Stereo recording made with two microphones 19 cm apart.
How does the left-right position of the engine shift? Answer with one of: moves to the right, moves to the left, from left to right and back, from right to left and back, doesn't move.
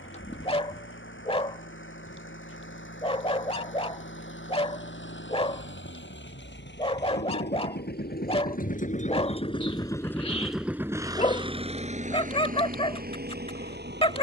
moves to the right.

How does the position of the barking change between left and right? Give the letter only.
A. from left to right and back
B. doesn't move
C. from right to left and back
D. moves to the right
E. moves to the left
B.